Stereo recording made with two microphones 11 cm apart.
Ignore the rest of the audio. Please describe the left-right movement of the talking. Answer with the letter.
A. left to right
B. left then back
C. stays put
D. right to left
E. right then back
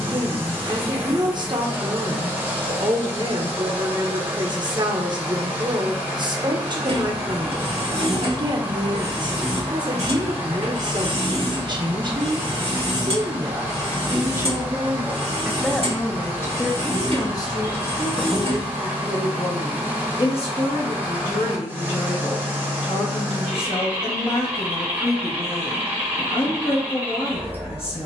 D.